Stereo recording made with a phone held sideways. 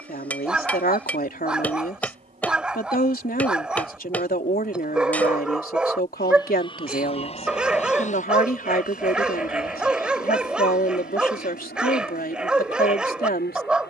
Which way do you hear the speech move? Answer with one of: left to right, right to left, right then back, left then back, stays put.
stays put.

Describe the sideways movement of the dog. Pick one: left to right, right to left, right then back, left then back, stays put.
stays put.